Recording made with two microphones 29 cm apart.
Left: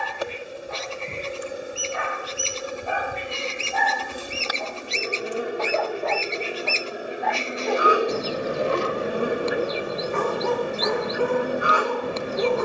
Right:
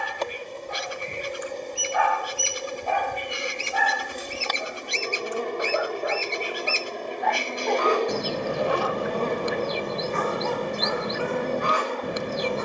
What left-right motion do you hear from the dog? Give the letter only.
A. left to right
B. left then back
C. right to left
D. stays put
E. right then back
E.